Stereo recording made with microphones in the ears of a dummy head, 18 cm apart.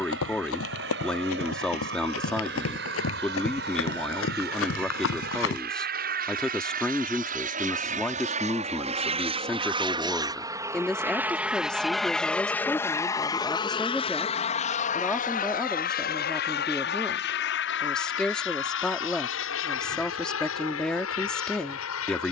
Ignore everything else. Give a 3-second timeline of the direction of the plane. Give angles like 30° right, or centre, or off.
60° right, 60° right, 40° right, 20° right, 20° left, 50° left, 60° left, 70° left.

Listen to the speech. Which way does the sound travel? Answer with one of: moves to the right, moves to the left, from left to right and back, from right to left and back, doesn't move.
doesn't move.